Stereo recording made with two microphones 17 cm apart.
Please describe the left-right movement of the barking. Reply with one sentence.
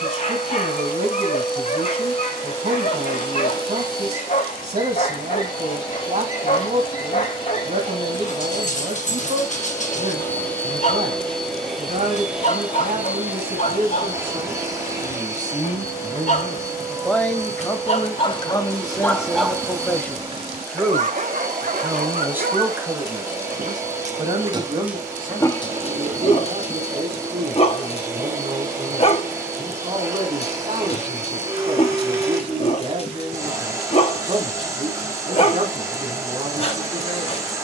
You can hear the barking go right and come back.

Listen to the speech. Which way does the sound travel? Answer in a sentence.
In this clip you hear the speech go left and come back.